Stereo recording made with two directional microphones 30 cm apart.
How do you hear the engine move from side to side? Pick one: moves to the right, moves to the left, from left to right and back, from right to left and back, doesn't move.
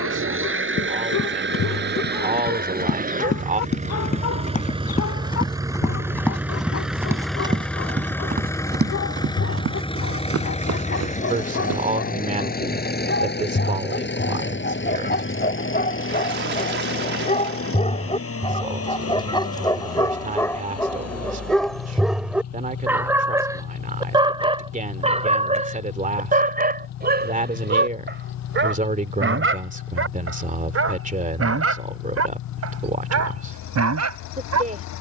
moves to the left.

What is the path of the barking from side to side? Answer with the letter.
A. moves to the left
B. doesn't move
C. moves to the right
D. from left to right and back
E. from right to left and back
C.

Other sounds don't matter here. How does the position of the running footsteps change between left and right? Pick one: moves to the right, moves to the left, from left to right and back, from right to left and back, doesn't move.
moves to the right.